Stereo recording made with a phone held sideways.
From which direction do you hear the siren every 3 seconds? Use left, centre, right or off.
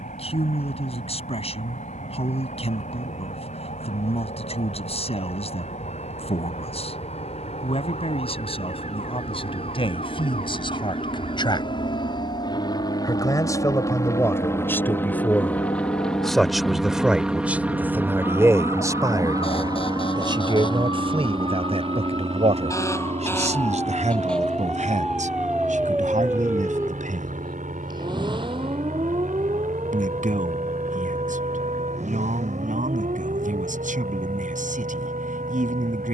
left, left, left, left, left, left, left, left, centre, right, right, right.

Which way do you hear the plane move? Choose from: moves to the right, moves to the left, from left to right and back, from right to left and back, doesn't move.
moves to the right.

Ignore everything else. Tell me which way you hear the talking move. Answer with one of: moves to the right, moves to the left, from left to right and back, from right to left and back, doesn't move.
moves to the right.